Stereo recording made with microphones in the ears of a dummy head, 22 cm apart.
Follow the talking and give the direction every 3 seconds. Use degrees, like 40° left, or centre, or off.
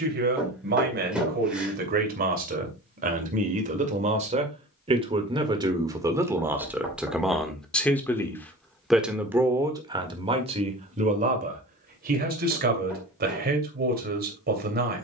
40° right, 30° right, centre, 20° right, 40° right.